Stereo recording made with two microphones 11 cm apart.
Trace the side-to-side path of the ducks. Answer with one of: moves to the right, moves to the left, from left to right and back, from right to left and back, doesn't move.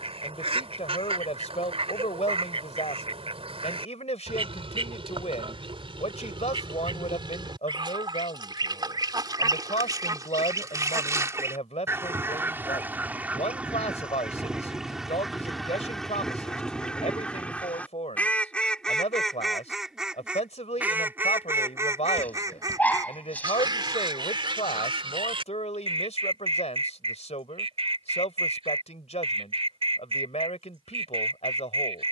from right to left and back.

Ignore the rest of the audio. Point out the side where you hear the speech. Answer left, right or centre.
left.